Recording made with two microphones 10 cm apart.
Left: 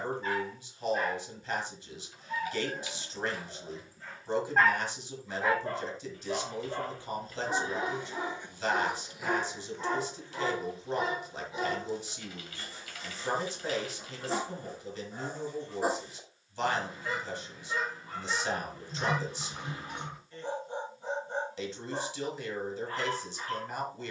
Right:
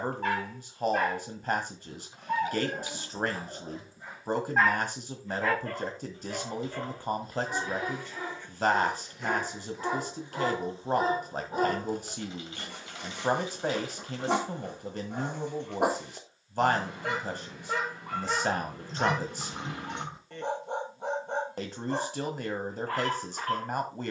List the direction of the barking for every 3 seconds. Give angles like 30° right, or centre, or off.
60° right, 10° right, 20° left, 20° right, 70° right, 70° right, 70° right, 70° right.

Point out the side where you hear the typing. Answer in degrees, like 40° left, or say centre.
20° right.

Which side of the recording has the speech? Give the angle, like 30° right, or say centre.
50° right.